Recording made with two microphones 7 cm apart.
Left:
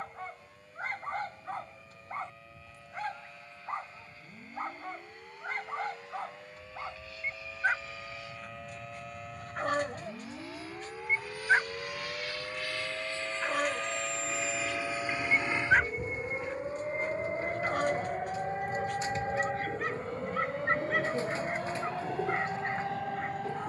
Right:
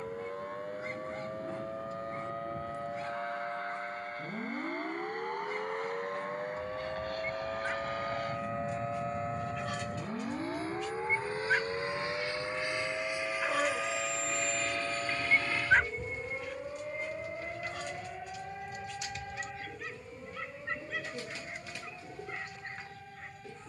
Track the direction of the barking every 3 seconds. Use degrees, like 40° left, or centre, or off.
60° left, 60° left, 60° left, 50° left, centre, 40° left, 60° left, 60° left.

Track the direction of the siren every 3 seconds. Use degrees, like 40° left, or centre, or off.
60° right, 50° right, 40° right, 20° right, 10° right, 10° left, 30° left, 50° left.